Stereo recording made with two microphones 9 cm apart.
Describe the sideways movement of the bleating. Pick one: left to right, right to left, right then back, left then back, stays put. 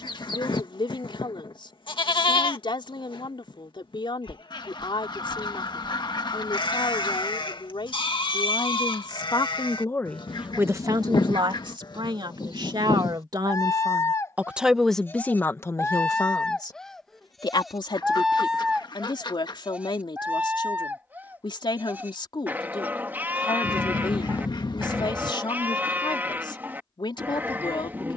left to right.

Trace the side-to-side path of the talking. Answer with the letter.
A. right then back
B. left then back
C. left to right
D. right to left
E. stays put
A.